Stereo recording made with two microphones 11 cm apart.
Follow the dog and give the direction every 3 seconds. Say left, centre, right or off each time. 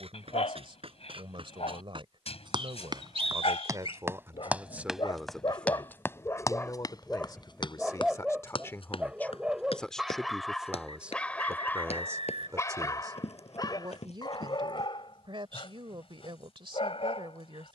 left, left, centre, centre, left, left.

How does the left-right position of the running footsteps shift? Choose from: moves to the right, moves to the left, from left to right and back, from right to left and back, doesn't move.
moves to the left.